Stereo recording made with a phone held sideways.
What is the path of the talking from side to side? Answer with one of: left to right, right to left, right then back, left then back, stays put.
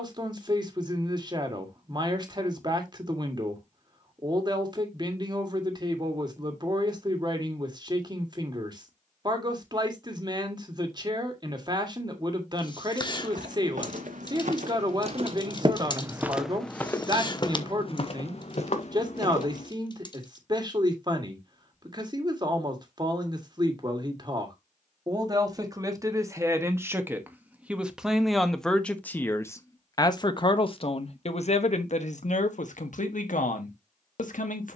right to left.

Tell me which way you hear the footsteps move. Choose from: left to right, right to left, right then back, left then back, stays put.
right to left.